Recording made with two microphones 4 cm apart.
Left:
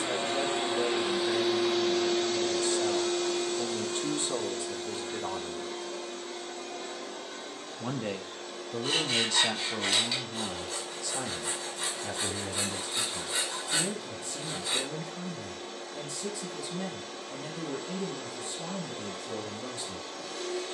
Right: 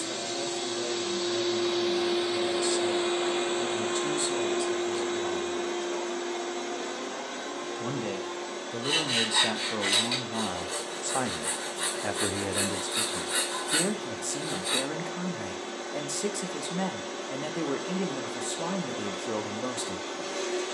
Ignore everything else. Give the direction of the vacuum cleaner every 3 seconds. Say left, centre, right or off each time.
centre, right, right, right, right, right, right.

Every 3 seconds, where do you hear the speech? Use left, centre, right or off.
left, left, centre, right, right, right, right.